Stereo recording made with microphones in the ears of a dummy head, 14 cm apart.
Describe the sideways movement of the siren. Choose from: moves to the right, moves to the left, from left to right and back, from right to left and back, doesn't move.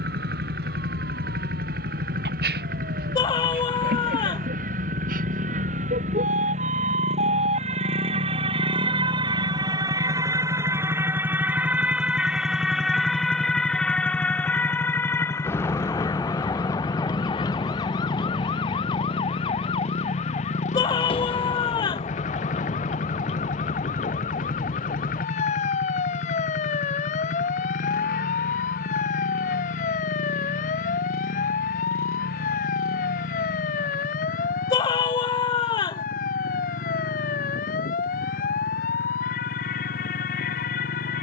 moves to the left.